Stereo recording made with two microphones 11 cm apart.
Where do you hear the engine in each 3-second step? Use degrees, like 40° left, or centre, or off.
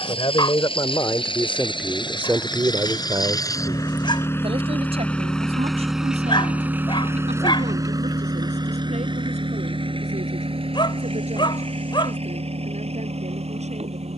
50° left, 20° left, 20° right, 50° right, 70° right.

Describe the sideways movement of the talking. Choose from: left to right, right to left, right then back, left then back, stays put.
left to right.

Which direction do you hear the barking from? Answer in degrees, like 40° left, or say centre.
50° left.